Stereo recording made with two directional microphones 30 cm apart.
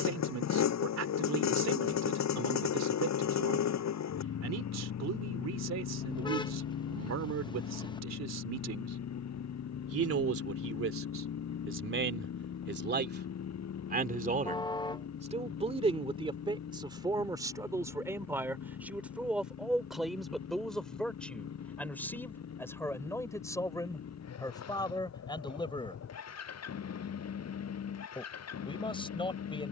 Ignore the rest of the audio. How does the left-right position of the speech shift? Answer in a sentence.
You can hear the speech travel towards the left.